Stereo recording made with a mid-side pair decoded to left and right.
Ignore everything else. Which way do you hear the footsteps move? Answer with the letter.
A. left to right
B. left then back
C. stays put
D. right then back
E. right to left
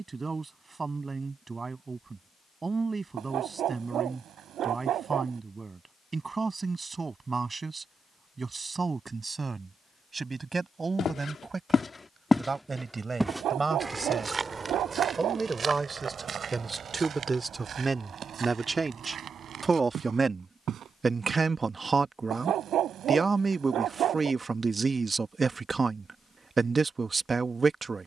A.